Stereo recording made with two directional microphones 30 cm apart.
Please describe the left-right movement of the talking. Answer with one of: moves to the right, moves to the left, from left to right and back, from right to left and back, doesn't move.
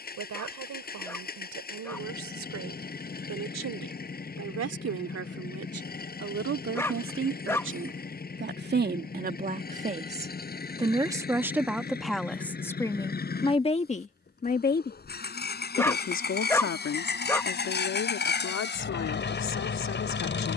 moves to the left.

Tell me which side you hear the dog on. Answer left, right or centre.
centre.